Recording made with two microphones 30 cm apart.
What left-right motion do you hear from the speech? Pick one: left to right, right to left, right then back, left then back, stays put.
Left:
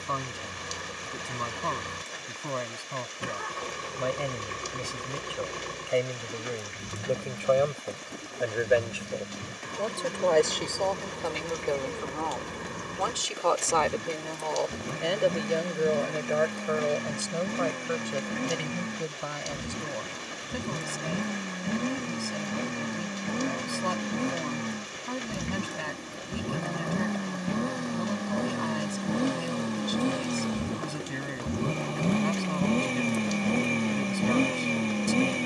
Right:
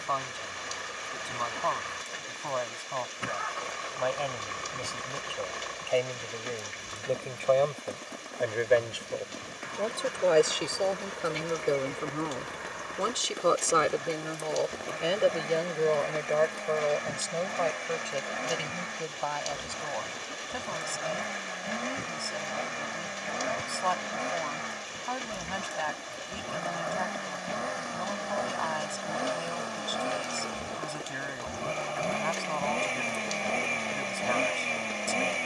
right then back.